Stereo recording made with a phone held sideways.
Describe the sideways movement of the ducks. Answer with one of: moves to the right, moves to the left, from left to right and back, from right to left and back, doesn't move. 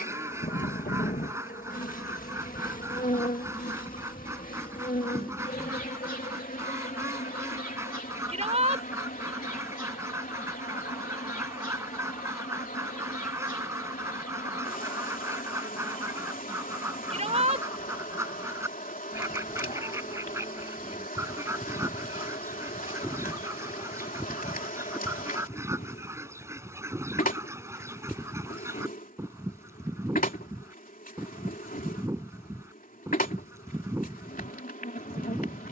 doesn't move.